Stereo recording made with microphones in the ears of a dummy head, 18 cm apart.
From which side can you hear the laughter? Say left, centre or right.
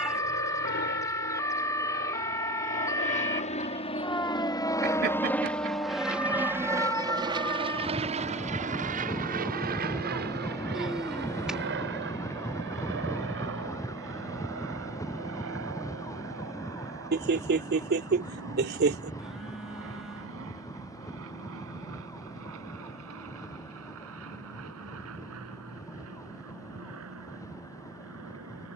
right.